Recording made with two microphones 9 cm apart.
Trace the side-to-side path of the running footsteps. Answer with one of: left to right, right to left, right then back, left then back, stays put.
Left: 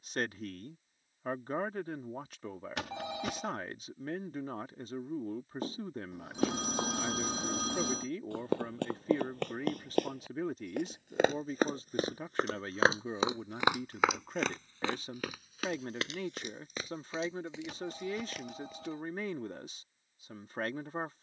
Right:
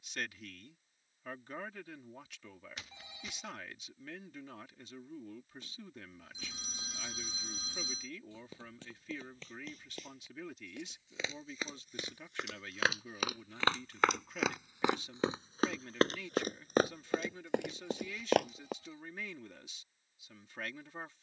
left to right.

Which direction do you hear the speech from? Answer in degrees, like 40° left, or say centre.
40° left.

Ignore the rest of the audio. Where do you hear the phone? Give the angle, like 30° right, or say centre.
80° left.